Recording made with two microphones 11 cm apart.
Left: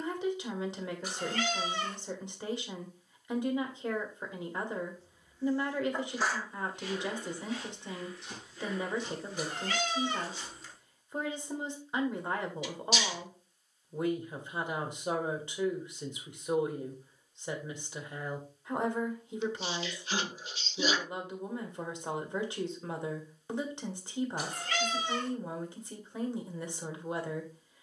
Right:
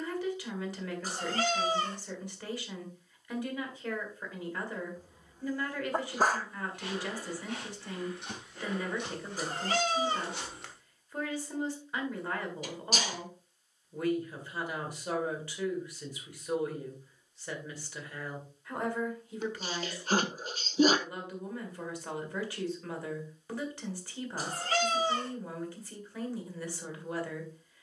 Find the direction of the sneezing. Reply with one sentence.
You can hear the sneezing on the right.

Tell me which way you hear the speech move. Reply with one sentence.
You can hear the speech stay in one place.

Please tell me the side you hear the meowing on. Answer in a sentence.
You can hear the meowing on the right.